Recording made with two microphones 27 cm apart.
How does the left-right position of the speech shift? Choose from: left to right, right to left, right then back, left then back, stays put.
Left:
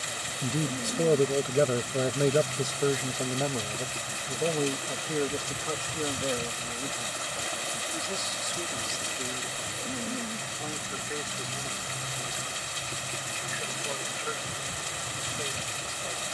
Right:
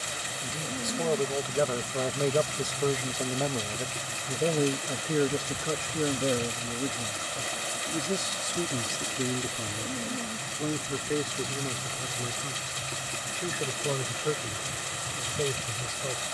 left to right.